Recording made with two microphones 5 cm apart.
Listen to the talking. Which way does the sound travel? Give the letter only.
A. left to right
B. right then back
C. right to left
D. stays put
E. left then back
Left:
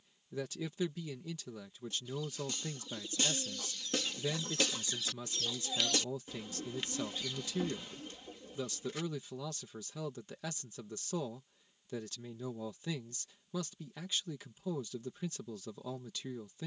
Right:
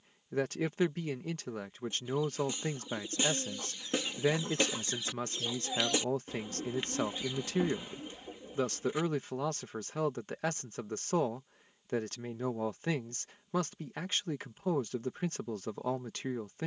D.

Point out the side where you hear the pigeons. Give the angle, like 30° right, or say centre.
20° right.